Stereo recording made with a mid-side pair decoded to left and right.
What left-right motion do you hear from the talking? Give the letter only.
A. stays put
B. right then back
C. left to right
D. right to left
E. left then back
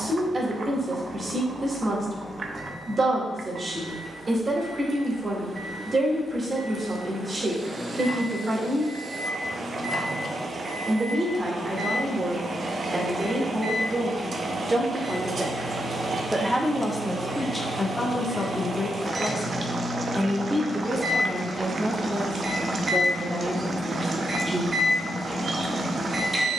E.